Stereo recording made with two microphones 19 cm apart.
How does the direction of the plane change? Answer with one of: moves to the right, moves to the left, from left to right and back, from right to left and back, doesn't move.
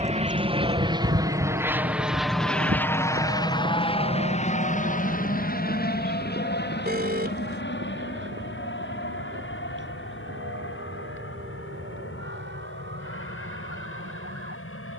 moves to the left.